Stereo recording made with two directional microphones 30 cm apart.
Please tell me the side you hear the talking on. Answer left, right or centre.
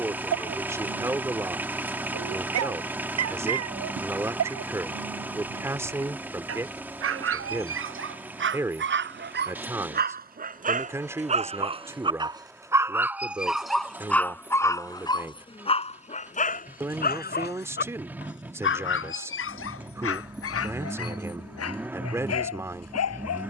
centre.